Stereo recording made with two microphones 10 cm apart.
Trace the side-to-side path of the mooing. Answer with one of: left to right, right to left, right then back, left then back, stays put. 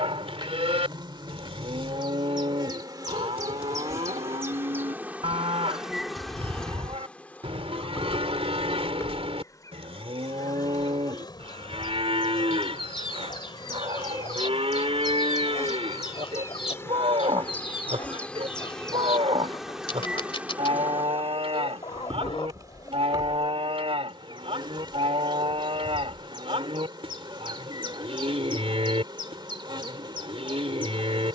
stays put.